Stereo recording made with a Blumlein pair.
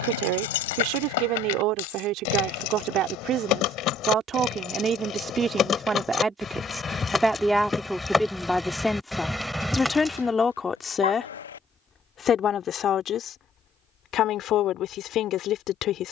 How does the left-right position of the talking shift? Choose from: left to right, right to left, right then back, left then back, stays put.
right to left.